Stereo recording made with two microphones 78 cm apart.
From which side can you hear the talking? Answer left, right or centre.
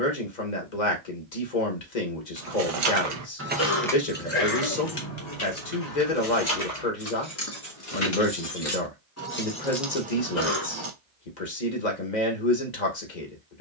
left.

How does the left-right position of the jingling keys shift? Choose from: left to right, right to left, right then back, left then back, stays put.
left then back.